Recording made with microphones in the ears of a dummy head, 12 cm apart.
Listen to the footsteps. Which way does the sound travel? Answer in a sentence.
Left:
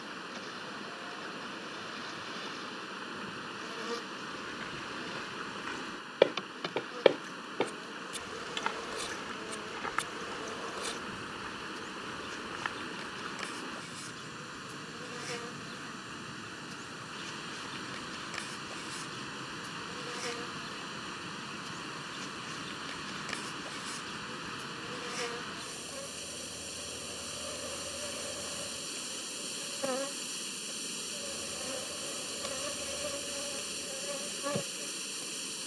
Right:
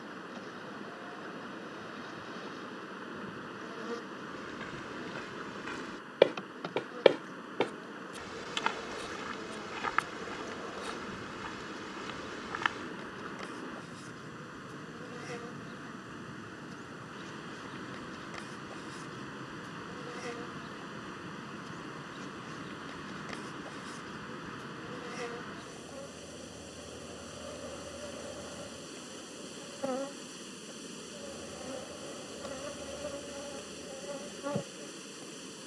You can hear the footsteps move from left to right.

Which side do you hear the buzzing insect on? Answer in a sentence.
You can hear the buzzing insect on the left.